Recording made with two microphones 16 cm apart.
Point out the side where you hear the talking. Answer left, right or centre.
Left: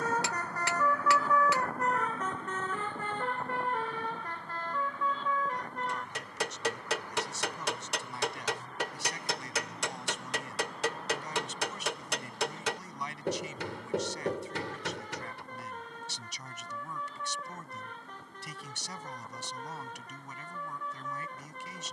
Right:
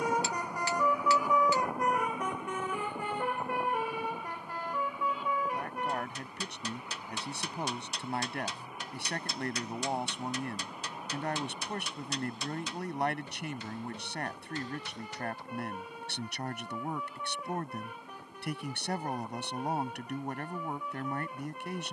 right.